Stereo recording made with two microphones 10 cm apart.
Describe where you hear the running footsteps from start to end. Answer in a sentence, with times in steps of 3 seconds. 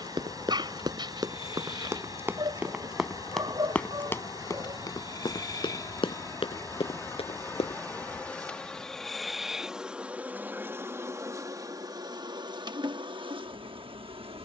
You can hear the running footsteps on the right from 0 s, on the left from 3 s and not at all from 9 s.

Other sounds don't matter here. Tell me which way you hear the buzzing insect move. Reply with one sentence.
In this clip you hear the buzzing insect go from the left side to the right.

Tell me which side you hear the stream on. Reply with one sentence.
You can hear the stream on the right.